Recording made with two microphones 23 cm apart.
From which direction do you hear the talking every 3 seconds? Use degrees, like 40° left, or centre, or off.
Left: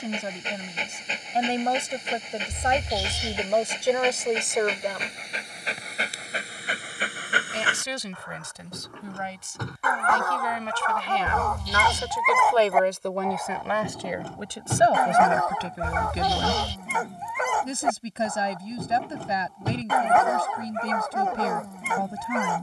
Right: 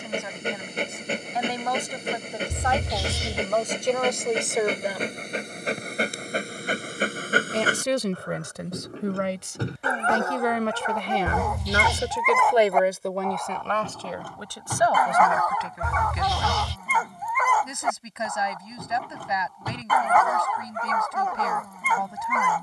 30° left, centre, 60° right, 60° right, centre, 30° left, 30° left, 30° left.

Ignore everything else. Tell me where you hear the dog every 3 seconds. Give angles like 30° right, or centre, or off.
60° right, 50° right, 40° right, 20° right, 10° left, 30° left, 30° left, 30° left.